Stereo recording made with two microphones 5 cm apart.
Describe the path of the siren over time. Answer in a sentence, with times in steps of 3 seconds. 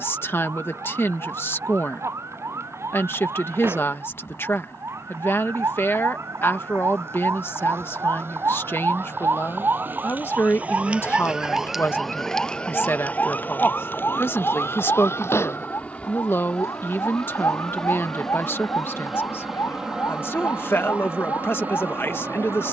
You can hear the siren on the right from 0 s and on the left from 12 s.